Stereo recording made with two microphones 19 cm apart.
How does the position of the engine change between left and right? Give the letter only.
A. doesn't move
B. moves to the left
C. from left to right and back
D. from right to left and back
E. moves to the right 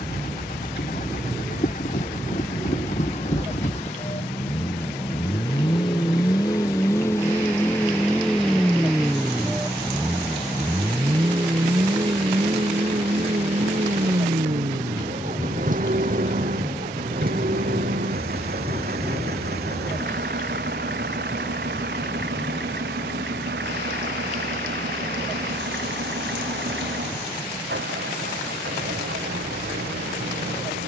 E.